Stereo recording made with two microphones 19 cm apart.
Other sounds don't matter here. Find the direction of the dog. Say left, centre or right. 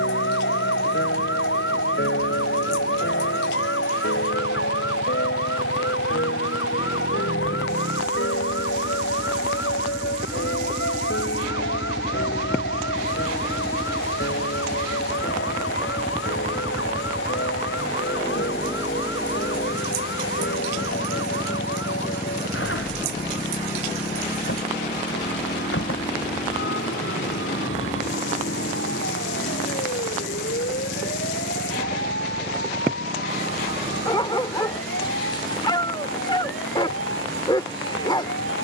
left.